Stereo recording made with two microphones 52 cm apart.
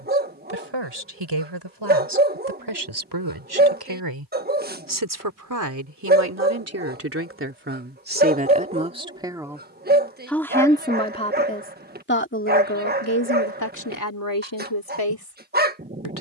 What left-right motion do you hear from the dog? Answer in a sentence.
You can hear the dog stay put.